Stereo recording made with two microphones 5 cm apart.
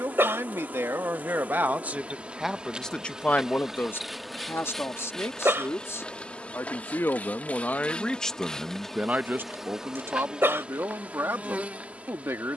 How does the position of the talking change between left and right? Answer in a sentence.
You can hear the talking move from right to left and back again.